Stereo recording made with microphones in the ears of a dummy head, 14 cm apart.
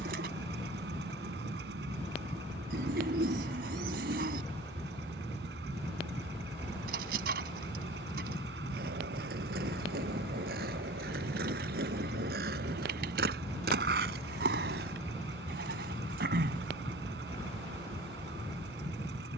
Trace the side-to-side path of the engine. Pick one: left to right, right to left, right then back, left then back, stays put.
stays put.